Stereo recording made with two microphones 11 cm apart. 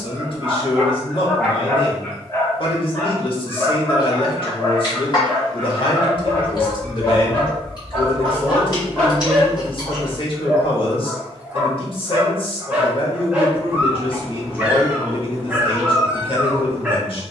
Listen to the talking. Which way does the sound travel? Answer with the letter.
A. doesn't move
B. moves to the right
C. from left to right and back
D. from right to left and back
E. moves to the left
A.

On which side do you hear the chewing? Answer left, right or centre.
left.